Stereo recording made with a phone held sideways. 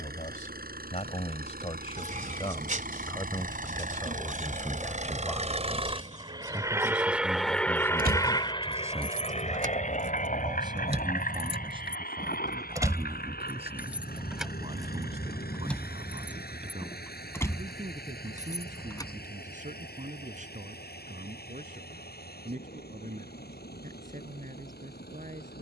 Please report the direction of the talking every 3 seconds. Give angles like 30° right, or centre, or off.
40° left, 20° left, 10° right, 30° right, 40° right, 50° right, 50° right, 60° right, 60° right.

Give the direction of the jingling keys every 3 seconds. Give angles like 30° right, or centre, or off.
off, off, 70° right, 50° right, 10° right, 10° left, 20° left, off, off.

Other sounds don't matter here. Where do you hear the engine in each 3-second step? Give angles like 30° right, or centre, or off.
70° right, 50° right, centre, 60° left, 70° left, 80° left, 80° left, 80° left, 80° left.